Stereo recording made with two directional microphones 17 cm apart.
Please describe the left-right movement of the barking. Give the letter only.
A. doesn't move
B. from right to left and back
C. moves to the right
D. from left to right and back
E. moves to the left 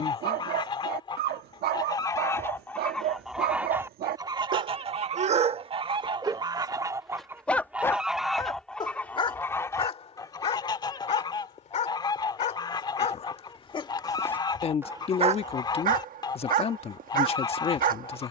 B.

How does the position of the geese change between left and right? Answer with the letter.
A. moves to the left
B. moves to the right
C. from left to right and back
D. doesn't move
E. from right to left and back
C.